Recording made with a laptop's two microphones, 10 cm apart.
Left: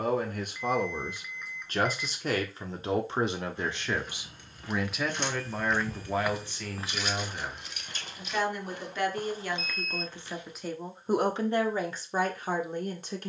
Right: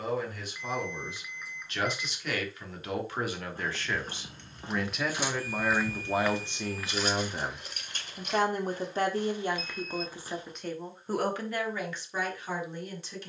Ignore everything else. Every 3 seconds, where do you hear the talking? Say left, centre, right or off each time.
left, centre, right, centre, left.